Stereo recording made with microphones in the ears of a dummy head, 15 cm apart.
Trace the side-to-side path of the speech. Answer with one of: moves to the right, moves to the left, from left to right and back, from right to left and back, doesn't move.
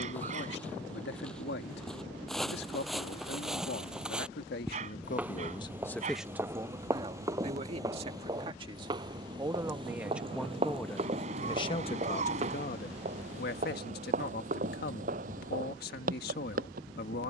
from left to right and back.